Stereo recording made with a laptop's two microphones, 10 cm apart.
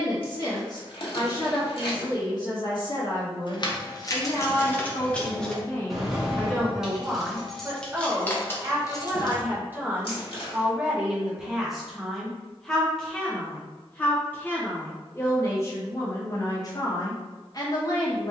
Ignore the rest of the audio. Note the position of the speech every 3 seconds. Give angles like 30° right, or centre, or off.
40° left, 40° left, 10° right, 10° right, 10° left, 30° left.